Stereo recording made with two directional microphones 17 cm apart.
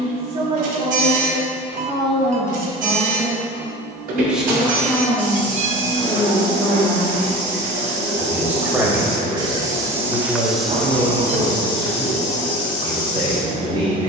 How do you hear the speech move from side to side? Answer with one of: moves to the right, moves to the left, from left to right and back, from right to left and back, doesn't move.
from right to left and back.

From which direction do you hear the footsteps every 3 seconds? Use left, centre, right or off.
off, right, right, centre, left.